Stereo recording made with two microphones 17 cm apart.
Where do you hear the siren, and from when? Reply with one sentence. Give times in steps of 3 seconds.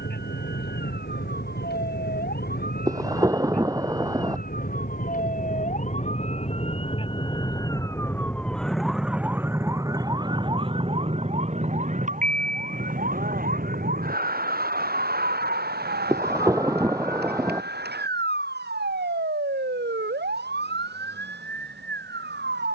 You can hear the siren on the left from 0 s and on the right from 9 s.